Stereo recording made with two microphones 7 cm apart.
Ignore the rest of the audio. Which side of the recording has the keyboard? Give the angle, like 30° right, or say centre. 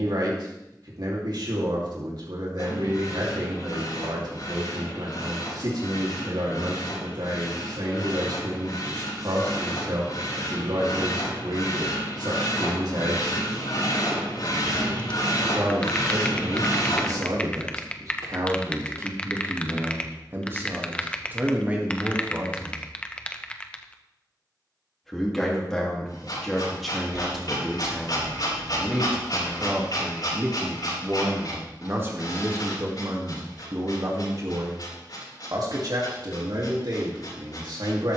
20° left.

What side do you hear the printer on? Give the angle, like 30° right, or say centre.
60° left.